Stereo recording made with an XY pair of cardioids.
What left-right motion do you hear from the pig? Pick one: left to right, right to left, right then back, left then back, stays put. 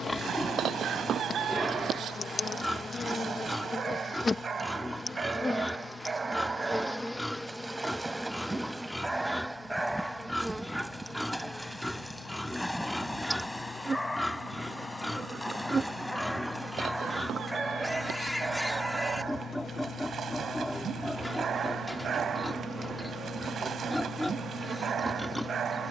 stays put.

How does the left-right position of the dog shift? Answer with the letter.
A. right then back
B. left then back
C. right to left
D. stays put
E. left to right
B.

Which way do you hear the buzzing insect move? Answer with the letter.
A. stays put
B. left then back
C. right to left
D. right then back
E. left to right
E.